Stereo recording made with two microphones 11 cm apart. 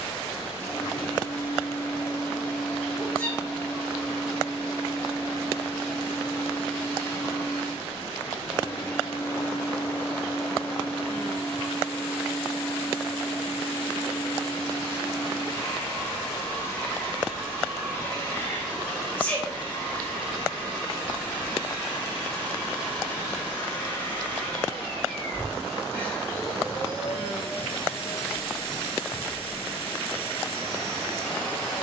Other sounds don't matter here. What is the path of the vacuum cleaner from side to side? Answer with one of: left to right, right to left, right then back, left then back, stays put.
stays put.